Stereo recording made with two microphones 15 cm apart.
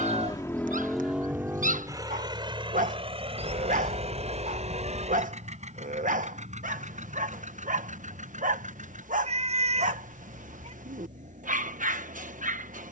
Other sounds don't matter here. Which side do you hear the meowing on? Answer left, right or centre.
right.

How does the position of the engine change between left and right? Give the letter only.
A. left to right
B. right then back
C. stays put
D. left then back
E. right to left
A.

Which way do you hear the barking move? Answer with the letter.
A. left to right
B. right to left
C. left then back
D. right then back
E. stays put
E.